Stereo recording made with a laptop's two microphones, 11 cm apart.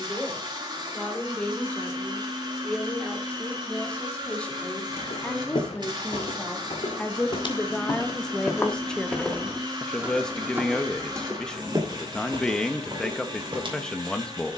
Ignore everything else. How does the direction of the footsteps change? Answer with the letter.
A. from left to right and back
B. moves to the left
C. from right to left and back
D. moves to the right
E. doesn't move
D.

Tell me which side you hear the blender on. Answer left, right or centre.
right.